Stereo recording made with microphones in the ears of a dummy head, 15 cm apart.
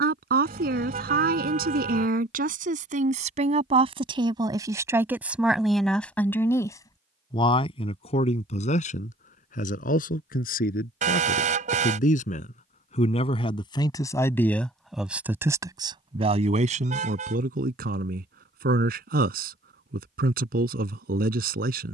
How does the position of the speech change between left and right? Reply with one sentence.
You can hear the speech go left and come back.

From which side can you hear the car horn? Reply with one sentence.
In this clip you hear the car horn on the right.